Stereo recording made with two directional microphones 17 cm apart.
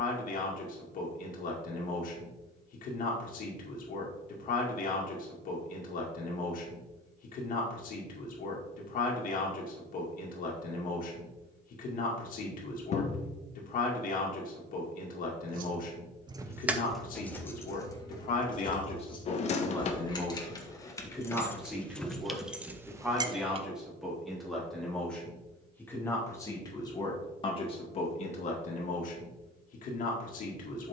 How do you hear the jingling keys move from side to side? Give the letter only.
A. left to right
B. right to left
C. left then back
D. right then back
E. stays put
C.